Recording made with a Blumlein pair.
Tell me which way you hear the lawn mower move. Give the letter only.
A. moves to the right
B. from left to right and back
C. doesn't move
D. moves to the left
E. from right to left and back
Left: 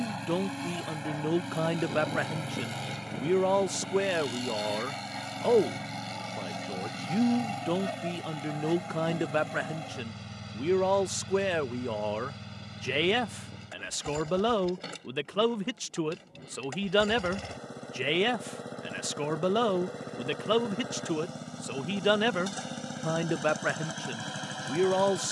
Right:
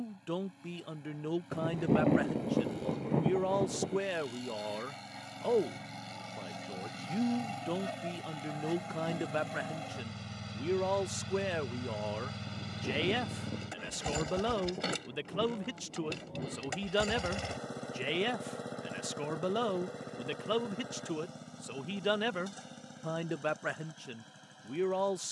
B.